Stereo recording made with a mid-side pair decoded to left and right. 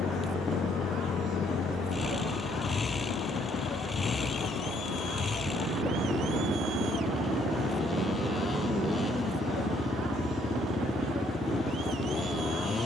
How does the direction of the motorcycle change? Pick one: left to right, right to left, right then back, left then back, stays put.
stays put.